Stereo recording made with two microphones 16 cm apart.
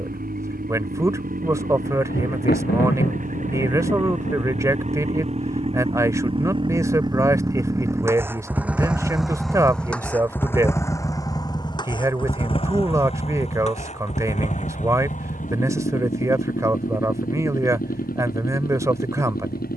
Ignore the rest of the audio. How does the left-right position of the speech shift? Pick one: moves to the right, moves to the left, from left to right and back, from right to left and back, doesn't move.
doesn't move.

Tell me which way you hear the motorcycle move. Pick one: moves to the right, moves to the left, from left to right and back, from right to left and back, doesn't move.
moves to the left.